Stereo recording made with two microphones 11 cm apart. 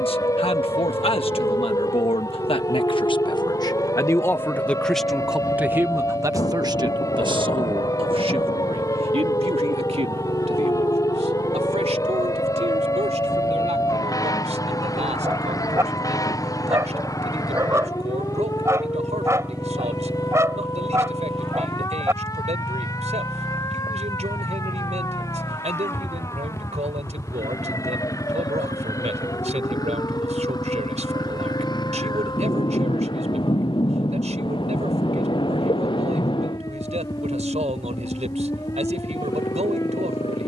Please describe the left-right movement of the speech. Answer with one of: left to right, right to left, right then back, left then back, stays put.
left to right.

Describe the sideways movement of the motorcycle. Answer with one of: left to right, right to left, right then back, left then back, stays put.
right to left.